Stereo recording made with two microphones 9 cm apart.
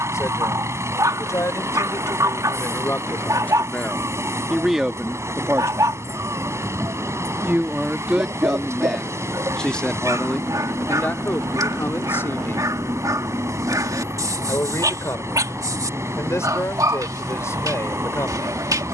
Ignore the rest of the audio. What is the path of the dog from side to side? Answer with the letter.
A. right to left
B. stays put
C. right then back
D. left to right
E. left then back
B.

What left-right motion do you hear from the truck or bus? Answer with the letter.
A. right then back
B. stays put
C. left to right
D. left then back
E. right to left
B.